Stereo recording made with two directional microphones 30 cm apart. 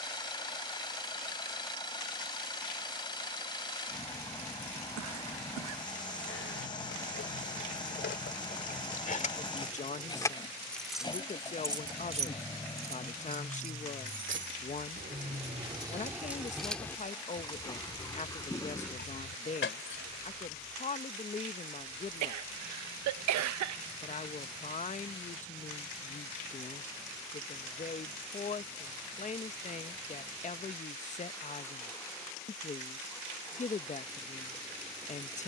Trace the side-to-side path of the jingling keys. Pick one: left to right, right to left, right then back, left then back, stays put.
right then back.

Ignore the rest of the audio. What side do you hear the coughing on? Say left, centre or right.
right.